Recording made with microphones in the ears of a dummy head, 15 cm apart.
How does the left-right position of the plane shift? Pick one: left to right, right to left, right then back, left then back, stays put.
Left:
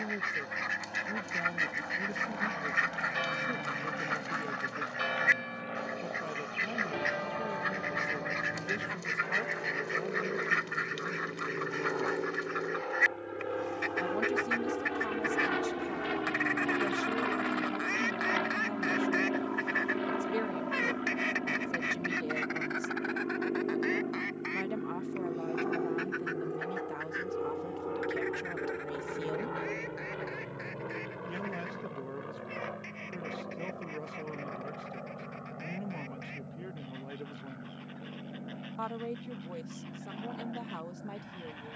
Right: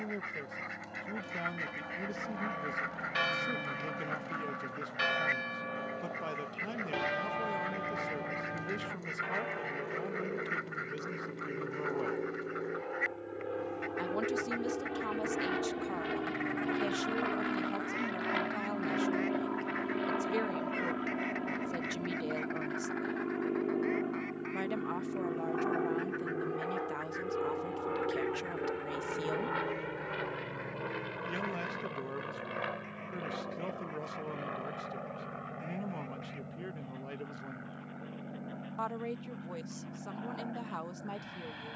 left to right.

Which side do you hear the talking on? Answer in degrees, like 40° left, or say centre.
20° right.